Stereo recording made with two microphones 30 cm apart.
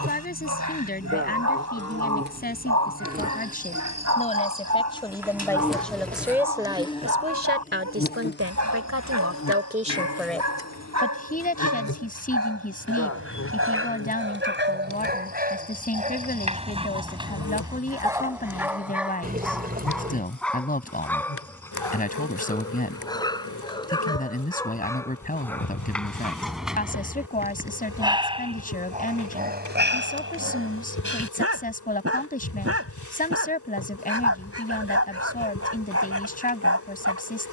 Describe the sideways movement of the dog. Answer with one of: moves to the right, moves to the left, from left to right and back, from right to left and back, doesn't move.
from right to left and back.